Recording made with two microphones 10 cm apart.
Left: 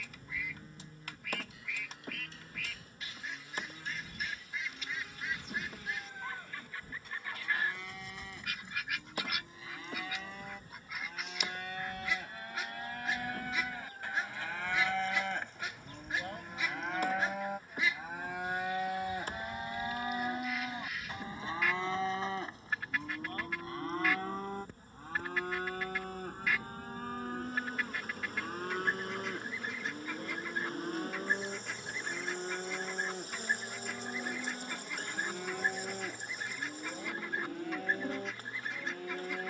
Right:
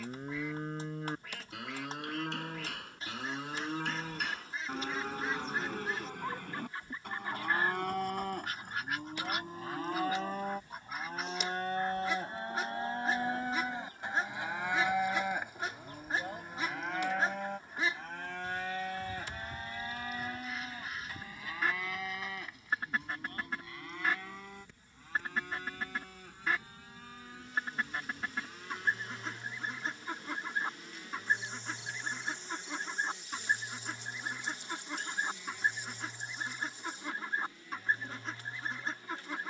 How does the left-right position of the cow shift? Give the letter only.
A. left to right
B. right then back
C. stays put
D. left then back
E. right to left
E.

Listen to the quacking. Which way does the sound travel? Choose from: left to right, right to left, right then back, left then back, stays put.
stays put.